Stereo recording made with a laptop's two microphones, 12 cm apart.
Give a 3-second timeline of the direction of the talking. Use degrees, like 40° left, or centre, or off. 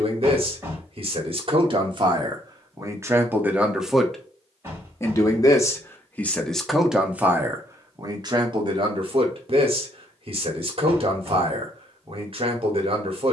50° right, centre, 20° right, 50° right, 50° right.